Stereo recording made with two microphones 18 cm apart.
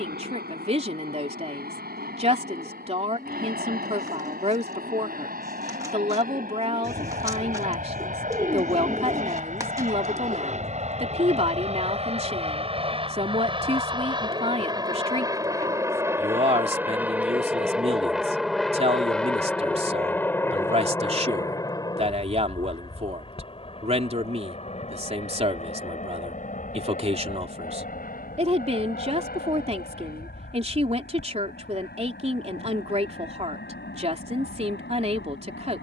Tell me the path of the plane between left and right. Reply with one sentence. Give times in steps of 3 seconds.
You can hear the plane on the right from 0 s, in the centre from 15 s and on the left from 21 s.